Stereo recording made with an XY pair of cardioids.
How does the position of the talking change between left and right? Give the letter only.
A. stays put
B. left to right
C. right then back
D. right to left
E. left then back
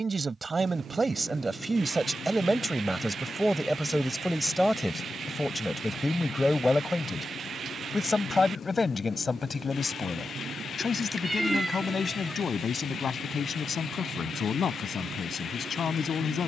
D.